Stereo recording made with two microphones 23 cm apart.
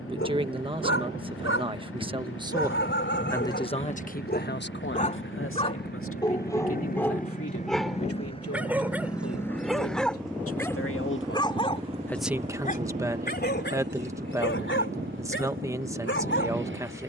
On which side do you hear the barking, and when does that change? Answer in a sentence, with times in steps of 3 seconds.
In this clip you hear the barking on the left from 0 s, in the centre from 6 s and on the left from 12 s.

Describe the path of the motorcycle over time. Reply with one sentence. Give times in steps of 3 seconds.
In this clip you hear the motorcycle on the left from 0 s, in the centre from 9 s and on the right from 12 s.